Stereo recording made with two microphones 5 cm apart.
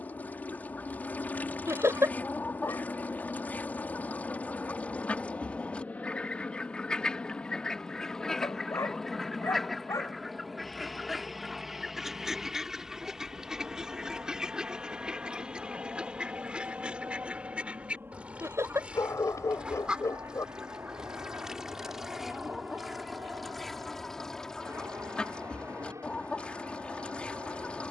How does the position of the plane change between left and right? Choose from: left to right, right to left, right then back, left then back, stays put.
left to right.